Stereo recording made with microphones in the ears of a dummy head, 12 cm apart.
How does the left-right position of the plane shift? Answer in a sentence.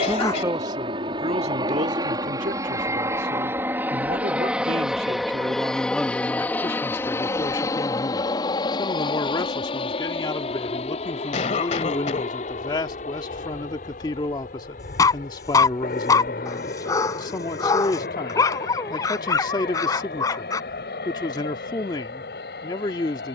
In this clip you hear the plane move to the left.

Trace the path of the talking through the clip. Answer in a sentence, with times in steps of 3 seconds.
You can hear the talking on the right from 0 s and on the left from 6 s.